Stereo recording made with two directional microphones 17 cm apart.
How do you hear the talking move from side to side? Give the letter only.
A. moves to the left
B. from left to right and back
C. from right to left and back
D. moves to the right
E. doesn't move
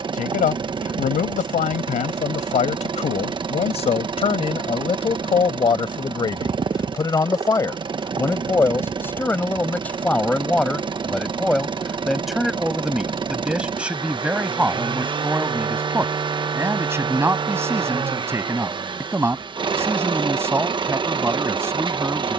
D.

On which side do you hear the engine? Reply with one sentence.
You can hear the engine on the right.